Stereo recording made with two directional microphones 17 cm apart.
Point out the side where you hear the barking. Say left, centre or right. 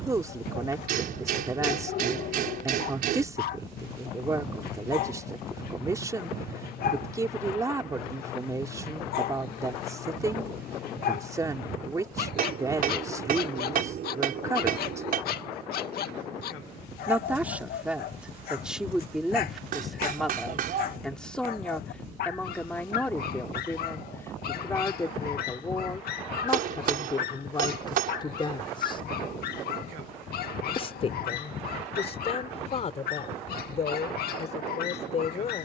left.